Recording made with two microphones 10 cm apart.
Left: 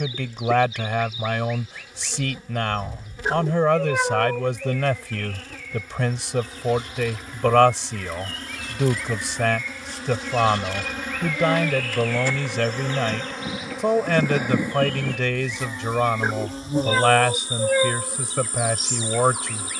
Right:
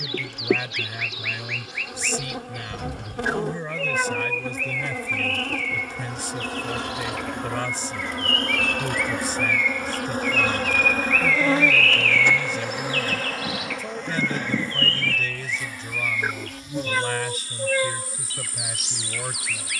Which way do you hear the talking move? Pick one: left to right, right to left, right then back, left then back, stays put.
stays put.